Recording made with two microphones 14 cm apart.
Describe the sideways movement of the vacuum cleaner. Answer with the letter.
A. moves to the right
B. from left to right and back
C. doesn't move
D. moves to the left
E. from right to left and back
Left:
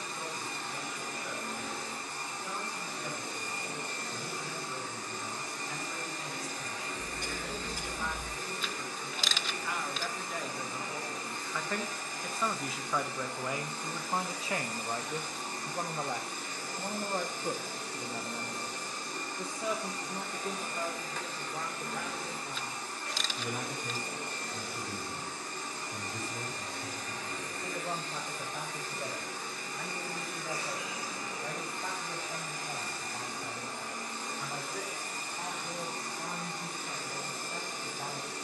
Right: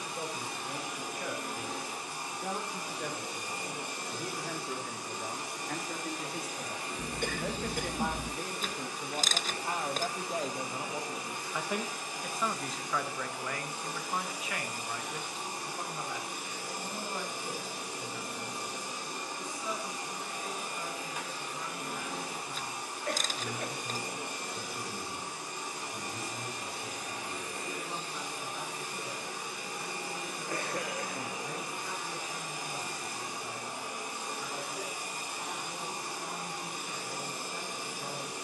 C.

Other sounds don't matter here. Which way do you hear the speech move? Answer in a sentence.
In this clip you hear the speech travel towards the left.